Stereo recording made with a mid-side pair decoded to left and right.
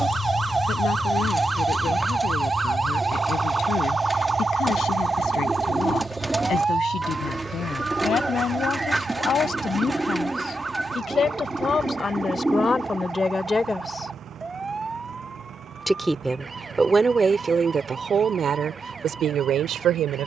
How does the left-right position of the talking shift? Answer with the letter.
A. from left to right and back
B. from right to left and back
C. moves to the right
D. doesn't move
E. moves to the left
C.